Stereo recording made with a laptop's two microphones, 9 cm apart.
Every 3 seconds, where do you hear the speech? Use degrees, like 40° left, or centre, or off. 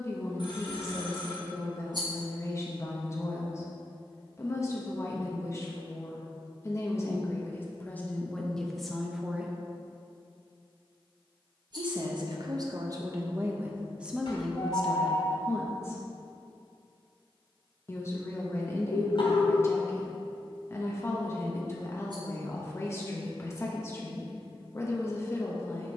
30° left, 30° left, 20° left, 20° right, 20° right, 20° left, 30° left, 30° left, 30° left.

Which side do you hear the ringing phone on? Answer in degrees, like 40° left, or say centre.
60° left.